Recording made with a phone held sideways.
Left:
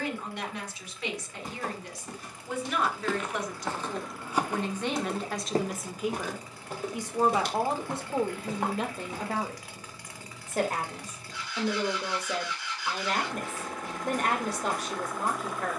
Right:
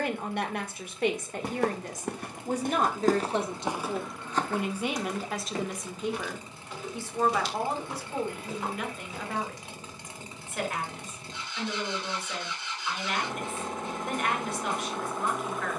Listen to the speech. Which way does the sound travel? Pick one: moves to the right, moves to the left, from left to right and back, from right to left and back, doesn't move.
moves to the left.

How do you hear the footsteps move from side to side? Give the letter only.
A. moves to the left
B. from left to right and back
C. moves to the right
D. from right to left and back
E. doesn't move
A.